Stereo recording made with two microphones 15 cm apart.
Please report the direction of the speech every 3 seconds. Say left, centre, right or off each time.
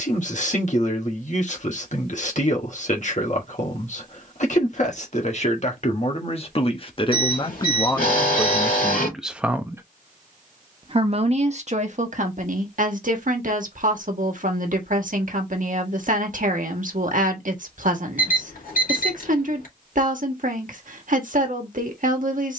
left, left, left, right, right, right, right, right.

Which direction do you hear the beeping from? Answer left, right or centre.
left.